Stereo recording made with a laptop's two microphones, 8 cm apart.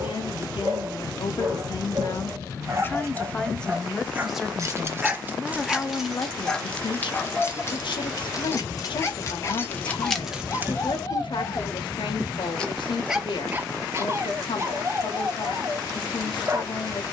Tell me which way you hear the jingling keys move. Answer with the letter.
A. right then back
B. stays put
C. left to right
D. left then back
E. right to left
D.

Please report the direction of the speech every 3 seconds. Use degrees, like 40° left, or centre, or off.
60° left, 10° left, 70° left, 70° left, 70° left, 70° left.